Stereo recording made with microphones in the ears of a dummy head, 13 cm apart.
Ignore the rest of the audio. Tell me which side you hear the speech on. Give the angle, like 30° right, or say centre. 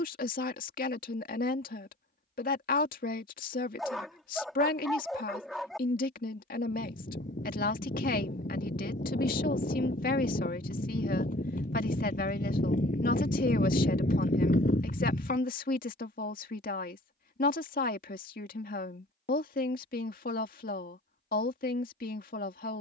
70° left.